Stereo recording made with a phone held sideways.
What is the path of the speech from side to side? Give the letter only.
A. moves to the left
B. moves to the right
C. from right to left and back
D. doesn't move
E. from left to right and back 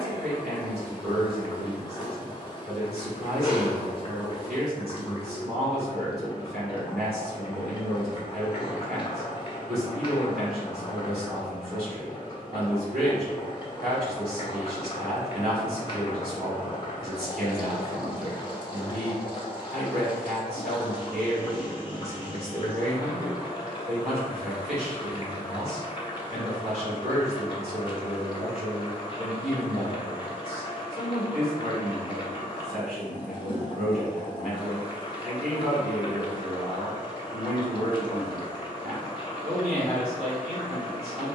D.